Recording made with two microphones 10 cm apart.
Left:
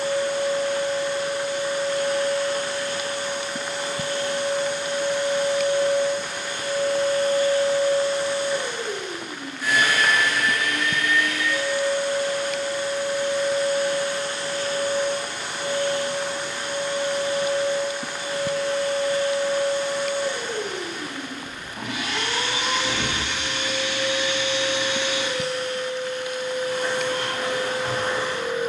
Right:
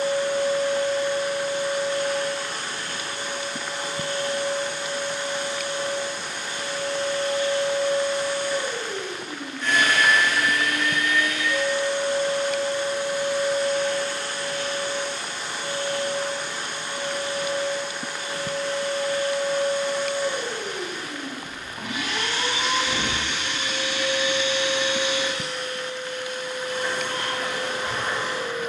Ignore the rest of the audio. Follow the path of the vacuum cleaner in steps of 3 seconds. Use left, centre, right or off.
left, left, left, centre, centre, left, left, left, left, left.